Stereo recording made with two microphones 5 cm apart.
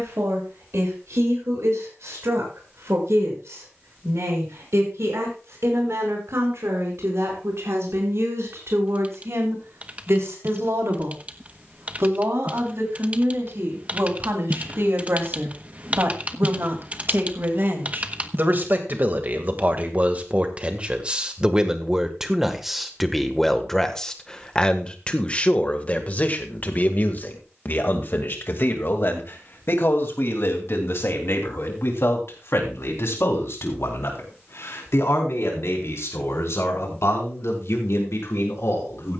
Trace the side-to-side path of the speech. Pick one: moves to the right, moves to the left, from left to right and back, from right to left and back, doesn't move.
moves to the left.